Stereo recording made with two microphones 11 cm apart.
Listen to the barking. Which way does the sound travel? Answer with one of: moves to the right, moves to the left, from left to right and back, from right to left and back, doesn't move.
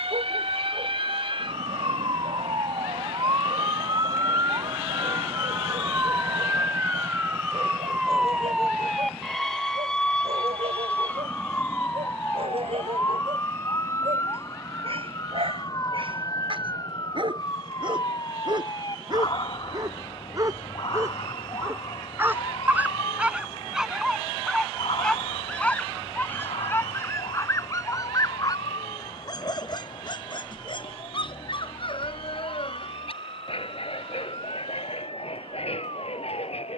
moves to the left.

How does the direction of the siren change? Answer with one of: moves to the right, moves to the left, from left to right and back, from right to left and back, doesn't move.
moves to the left.